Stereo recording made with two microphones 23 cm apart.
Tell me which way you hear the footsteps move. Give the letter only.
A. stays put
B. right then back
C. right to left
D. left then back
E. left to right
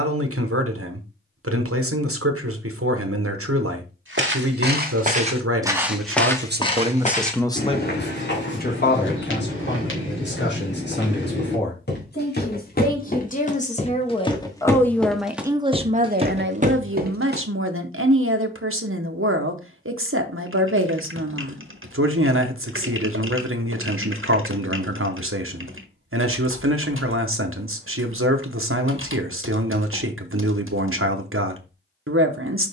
D.